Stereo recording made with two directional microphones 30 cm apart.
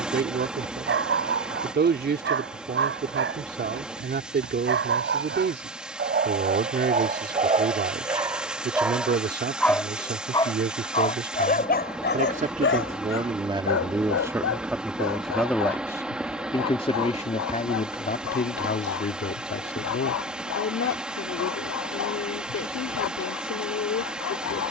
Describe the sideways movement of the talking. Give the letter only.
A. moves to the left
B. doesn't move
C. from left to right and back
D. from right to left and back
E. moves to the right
A.